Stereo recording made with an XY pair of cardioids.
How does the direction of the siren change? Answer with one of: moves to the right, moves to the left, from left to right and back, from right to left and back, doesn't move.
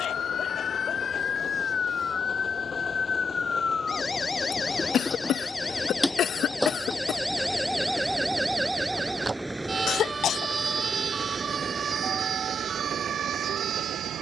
moves to the right.